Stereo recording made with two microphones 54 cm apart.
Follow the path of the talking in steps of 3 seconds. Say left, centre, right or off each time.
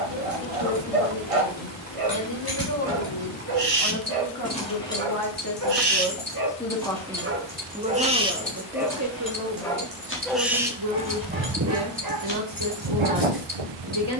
left, left, centre, right, right.